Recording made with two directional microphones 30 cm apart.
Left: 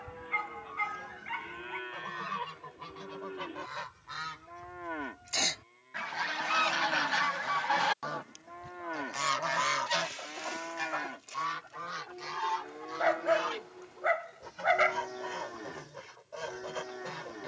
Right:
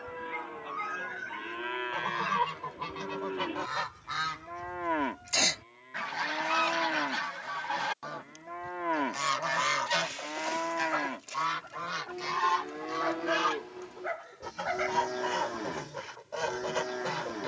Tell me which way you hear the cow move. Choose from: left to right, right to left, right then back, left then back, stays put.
stays put.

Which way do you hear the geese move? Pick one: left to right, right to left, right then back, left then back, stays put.
left then back.